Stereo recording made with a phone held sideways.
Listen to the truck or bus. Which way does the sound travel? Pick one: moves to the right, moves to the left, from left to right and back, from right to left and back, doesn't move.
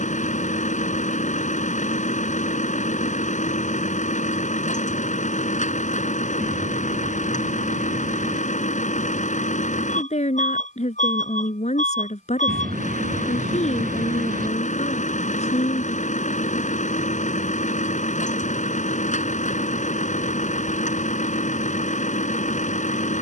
doesn't move.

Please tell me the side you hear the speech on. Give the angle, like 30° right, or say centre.
50° left.